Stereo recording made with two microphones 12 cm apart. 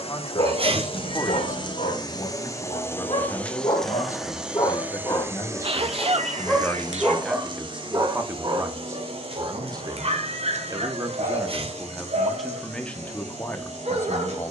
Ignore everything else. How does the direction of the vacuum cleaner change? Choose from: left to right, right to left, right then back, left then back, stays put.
left to right.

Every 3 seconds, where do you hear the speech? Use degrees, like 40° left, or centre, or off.
30° left, 30° left, centre, 20° right, 10° left.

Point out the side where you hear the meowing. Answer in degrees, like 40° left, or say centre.
70° right.